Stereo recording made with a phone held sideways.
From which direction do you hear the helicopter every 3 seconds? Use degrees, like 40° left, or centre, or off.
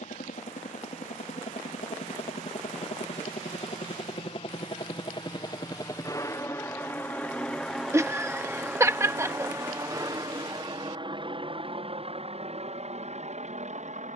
60° left, 40° left, 10° left, 30° right, 50° right.